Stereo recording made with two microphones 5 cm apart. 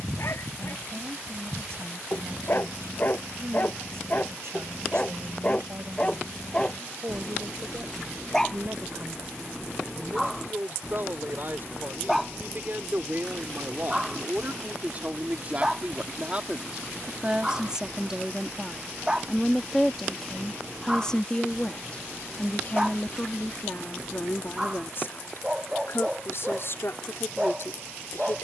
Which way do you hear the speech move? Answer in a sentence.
You can hear the speech move from right to left.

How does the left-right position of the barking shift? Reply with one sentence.
You can hear the barking move from left to right.